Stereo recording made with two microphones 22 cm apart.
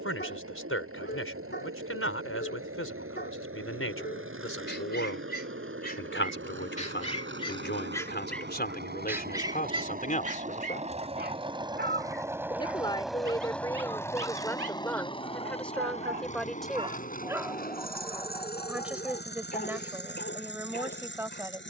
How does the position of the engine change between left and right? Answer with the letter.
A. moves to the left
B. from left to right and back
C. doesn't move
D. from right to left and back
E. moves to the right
A.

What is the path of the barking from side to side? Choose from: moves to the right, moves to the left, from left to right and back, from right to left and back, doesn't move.
from left to right and back.